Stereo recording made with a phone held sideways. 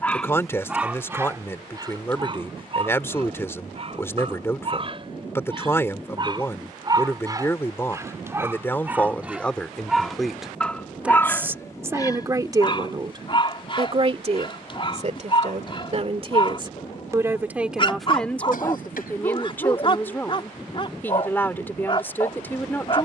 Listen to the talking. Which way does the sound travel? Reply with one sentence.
In this clip you hear the talking move from left to right and back again.